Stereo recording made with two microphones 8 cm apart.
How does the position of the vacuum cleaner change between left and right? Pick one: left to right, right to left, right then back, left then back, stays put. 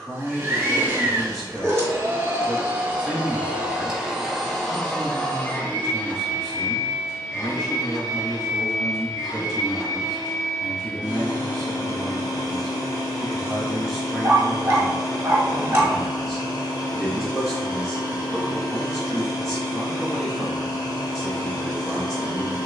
right to left.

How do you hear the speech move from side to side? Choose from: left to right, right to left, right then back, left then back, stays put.
stays put.